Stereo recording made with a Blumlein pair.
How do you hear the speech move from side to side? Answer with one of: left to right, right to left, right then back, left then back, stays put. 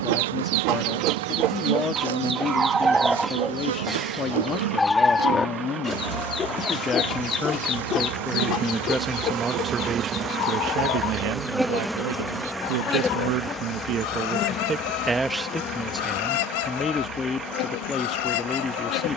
right then back.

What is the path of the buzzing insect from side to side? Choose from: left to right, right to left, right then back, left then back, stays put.
right to left.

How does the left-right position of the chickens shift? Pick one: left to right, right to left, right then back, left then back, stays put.
right to left.